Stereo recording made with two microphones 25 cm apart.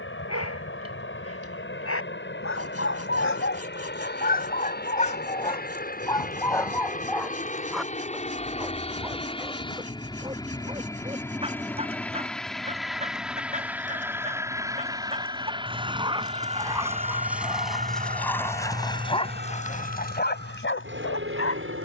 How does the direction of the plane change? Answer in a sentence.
You can hear the plane go from the left side to the right.